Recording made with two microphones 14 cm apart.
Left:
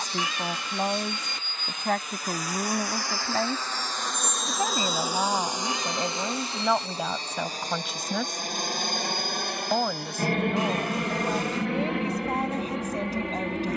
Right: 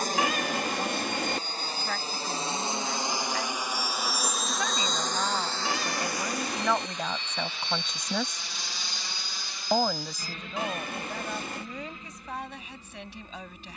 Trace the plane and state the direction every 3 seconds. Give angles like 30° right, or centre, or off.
40° right, centre, 40° left, 60° left, 70° left.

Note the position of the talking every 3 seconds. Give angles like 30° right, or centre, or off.
50° left, 30° left, 10° left, 20° left, 40° left.